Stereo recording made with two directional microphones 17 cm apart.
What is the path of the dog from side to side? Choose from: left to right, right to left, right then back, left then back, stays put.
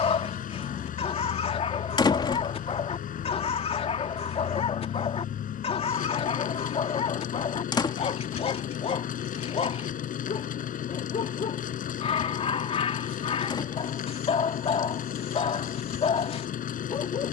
stays put.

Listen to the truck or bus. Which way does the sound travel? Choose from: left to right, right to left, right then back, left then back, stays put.
stays put.